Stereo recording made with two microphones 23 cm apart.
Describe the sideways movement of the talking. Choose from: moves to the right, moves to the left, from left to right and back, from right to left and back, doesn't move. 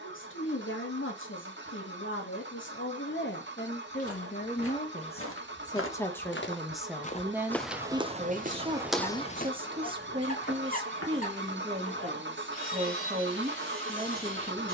moves to the right.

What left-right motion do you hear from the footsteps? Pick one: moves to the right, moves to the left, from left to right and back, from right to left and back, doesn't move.
from left to right and back.